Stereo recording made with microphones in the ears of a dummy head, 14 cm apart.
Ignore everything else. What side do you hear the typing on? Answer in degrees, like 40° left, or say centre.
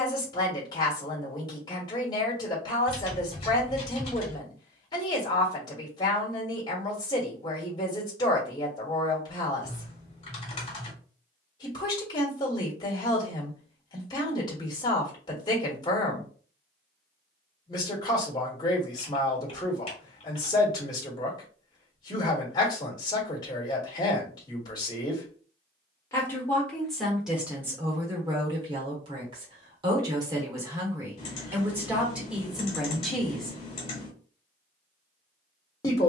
40° left.